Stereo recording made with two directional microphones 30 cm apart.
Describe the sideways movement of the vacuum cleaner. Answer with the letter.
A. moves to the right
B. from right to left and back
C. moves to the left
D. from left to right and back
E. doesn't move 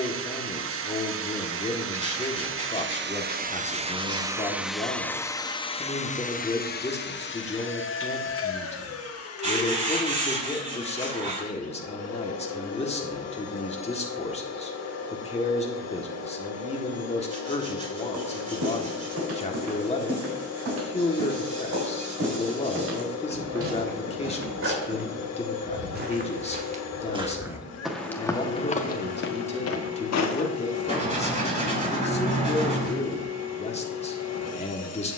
C.